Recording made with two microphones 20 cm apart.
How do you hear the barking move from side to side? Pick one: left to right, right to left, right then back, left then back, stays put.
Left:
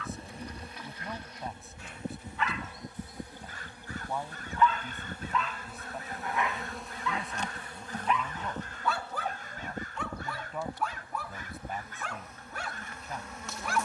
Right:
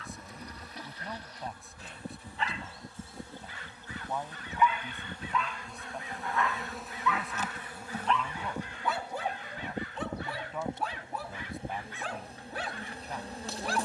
left then back.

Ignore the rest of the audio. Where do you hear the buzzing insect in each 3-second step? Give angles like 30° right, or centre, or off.
20° left, 10° left, 10° right, 20° right, 30° right.